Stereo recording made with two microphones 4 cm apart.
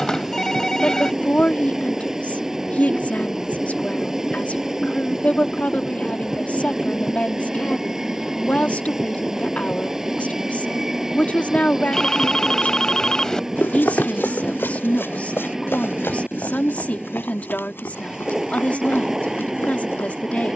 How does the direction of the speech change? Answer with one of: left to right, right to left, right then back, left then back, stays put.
stays put.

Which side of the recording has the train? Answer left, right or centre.
centre.